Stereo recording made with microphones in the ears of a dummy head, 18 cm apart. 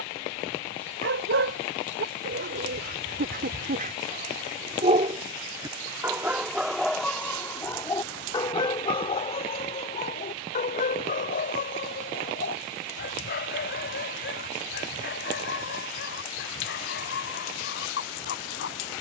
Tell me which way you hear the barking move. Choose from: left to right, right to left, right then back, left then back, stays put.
right to left.